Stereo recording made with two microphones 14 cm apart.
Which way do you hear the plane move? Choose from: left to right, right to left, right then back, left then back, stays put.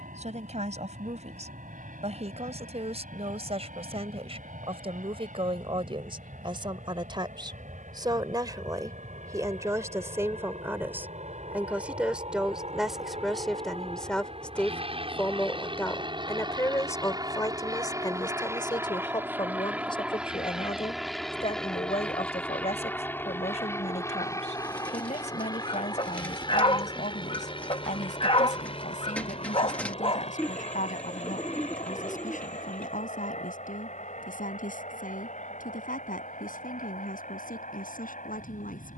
right to left.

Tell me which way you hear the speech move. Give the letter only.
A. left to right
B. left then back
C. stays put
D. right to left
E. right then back
D.